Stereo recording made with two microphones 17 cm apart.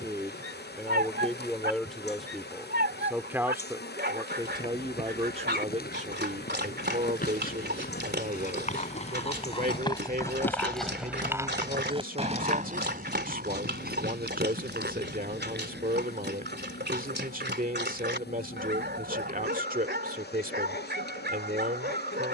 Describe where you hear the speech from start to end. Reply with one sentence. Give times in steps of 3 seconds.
In this clip you hear the speech in the centre from 0 s and on the right from 3 s.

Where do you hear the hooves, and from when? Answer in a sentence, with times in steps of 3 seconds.
You can hear the hooves not at all from 0 s, on the left from 3 s, in the centre from 9 s, on the right from 12 s and not at all from 18 s.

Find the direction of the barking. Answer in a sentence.
You can hear the barking on the right.